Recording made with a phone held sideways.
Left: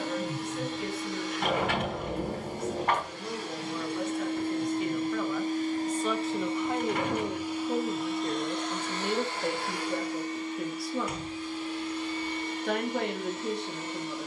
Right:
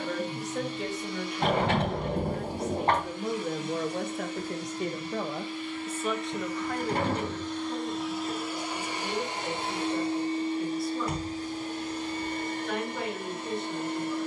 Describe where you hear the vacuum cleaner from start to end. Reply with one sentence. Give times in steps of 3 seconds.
In this clip you hear the vacuum cleaner on the left from 0 s, in the centre from 6 s and on the right from 9 s.